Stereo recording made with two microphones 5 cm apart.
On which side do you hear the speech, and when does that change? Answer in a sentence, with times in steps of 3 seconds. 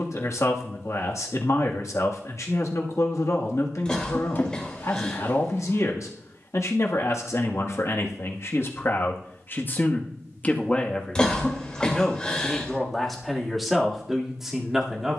In this clip you hear the speech on the left from 0 s and in the centre from 12 s.